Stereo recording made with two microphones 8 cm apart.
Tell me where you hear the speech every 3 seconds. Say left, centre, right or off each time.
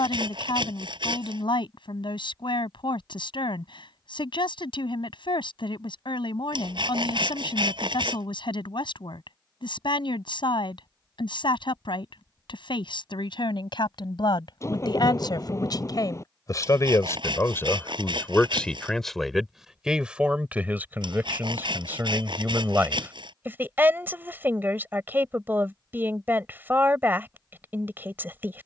left, left, left, left, left, left, centre, right, right, right.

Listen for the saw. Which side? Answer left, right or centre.
right.